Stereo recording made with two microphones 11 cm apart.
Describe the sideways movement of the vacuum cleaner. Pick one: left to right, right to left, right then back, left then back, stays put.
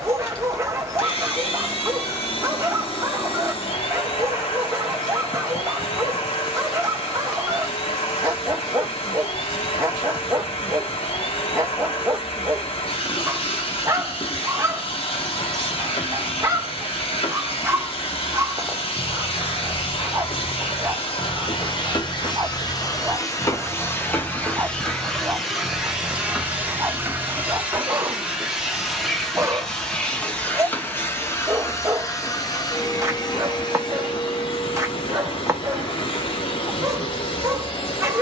right then back.